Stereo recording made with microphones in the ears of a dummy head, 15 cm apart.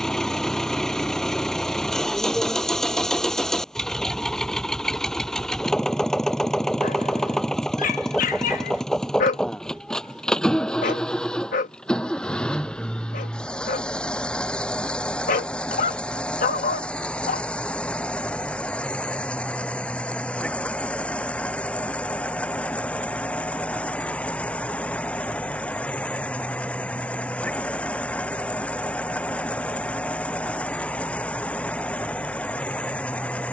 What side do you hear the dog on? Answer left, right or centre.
left.